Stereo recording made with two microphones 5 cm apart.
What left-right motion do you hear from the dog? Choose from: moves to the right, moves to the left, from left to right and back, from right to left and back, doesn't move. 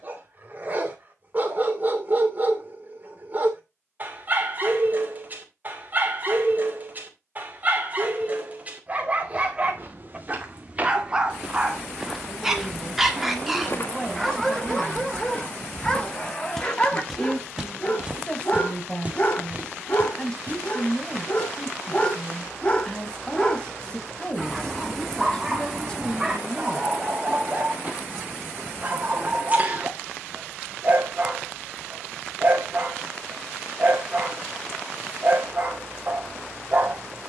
from right to left and back.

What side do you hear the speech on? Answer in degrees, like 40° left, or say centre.
20° left.